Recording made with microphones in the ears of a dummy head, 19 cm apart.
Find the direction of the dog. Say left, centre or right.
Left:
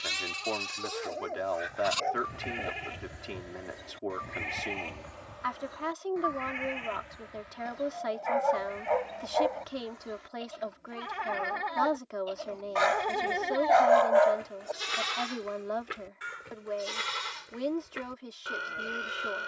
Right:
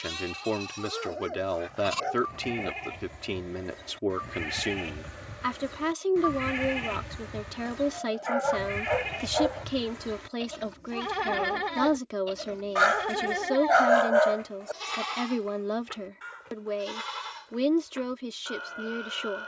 centre.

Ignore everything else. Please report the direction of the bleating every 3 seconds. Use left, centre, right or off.
left, centre, right, right, centre, left, left.